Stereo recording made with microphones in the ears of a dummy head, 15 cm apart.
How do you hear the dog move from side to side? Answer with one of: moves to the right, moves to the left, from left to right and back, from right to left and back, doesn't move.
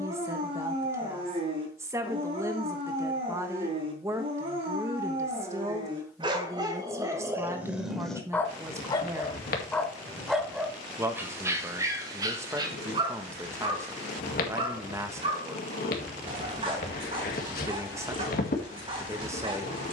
from right to left and back.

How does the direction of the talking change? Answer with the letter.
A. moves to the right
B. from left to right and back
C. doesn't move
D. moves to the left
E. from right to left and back
C.